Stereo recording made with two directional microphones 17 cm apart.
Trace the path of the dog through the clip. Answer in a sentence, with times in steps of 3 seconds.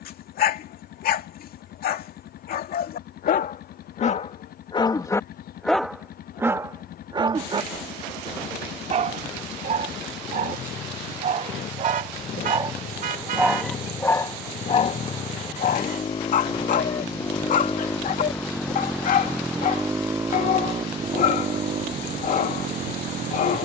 You can hear the dog on the left from 0 s, on the right from 6 s, in the centre from 12 s and on the left from 15 s.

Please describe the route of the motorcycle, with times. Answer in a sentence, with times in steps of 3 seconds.
You can hear the motorcycle on the left from 0 s, in the centre from 18 s and on the right from 21 s.